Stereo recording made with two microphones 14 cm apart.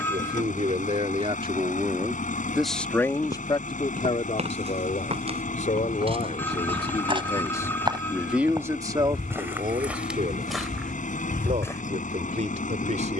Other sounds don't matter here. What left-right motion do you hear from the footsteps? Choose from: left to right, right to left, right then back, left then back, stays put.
right to left.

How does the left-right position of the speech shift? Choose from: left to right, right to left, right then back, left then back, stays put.
left then back.